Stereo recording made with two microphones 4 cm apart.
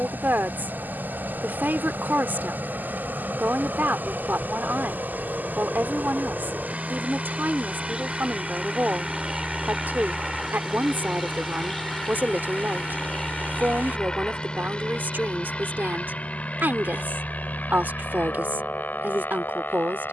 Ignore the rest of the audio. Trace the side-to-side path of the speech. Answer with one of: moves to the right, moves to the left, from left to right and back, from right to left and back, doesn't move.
doesn't move.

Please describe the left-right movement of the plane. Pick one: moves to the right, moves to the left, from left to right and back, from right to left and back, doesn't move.
moves to the left.